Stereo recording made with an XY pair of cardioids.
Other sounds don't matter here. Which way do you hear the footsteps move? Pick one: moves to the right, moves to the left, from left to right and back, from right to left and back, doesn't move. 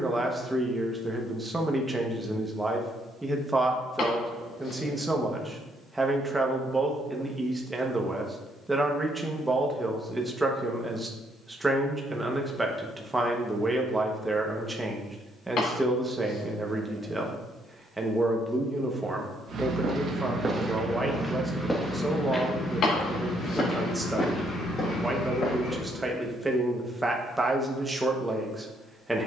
moves to the left.